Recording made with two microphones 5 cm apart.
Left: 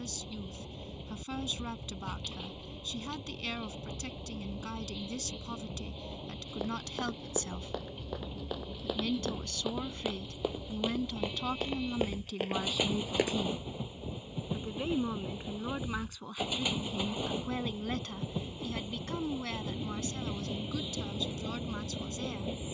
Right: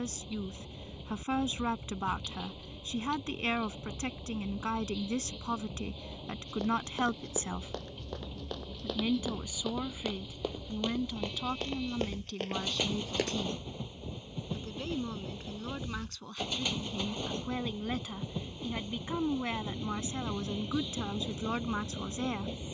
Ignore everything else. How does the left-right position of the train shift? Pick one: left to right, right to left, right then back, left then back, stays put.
stays put.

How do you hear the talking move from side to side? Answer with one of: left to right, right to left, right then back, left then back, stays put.
left then back.